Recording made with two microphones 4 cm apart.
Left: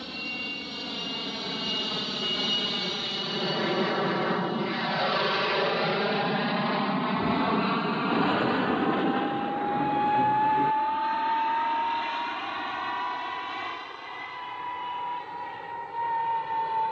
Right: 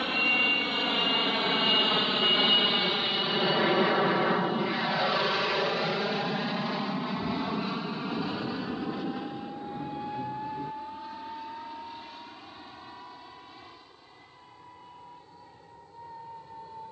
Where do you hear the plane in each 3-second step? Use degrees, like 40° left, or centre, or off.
30° right, centre, 30° left, 50° left, 60° left, 60° left.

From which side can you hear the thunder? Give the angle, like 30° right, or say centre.
60° left.